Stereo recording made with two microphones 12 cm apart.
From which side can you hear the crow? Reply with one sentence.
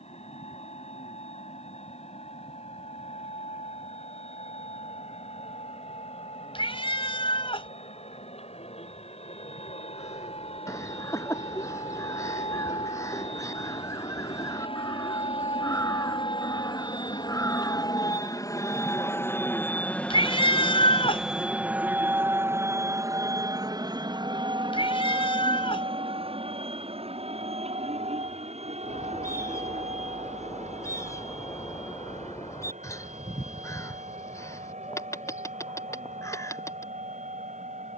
In this clip you hear the crow on the left.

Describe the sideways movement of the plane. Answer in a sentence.
You can hear the plane travel towards the right.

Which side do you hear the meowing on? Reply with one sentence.
In this clip you hear the meowing on the left.